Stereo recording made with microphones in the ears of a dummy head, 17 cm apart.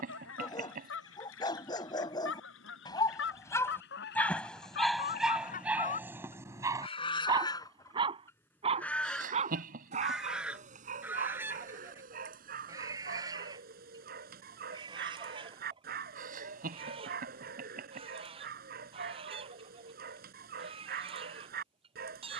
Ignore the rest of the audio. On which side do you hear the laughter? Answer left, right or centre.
right.